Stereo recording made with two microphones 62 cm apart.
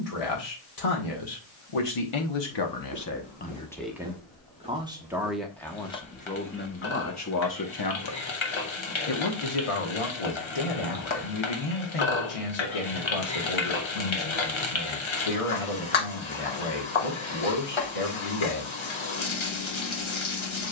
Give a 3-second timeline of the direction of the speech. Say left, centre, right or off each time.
left, centre, left, left, left, left, left.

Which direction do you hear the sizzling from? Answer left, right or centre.
left.